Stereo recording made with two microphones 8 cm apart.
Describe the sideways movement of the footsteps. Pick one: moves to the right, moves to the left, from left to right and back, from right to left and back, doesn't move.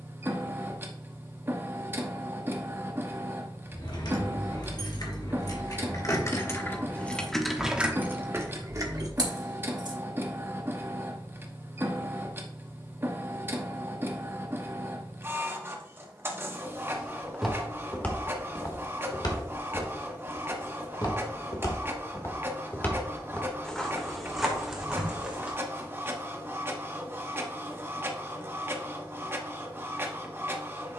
from right to left and back.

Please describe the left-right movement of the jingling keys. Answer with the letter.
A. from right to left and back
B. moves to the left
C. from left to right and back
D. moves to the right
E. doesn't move
D.